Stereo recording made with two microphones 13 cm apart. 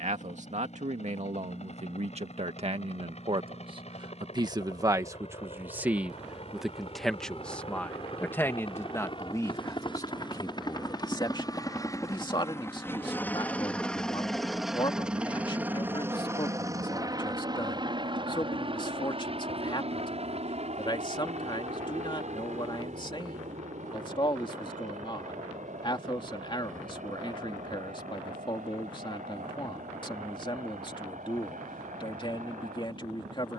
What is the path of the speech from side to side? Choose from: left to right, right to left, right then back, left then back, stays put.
right to left.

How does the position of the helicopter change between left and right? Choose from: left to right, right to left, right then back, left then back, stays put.
left to right.